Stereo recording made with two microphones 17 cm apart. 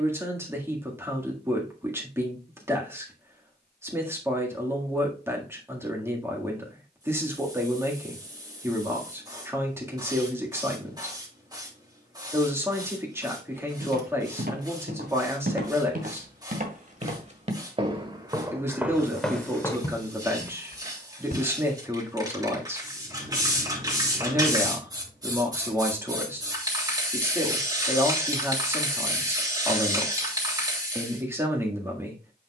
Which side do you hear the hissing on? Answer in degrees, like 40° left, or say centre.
20° right.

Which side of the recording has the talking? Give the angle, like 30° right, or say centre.
10° right.